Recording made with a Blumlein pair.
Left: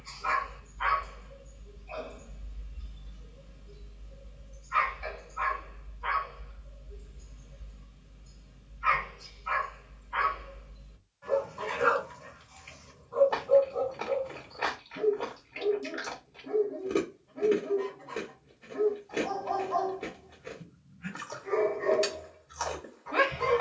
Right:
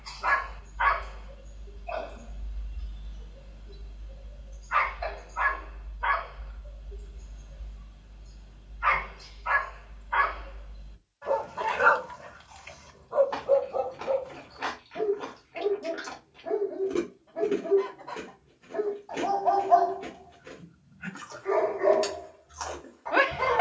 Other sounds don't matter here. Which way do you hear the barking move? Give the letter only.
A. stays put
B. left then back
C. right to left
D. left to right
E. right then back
A.